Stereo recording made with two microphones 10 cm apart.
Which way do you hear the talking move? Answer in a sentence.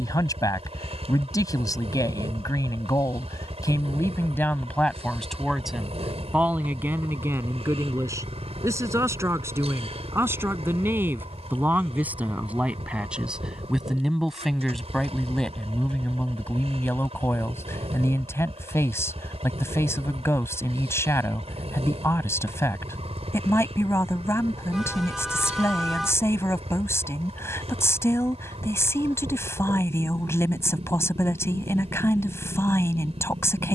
In this clip you hear the talking move from left to right and back again.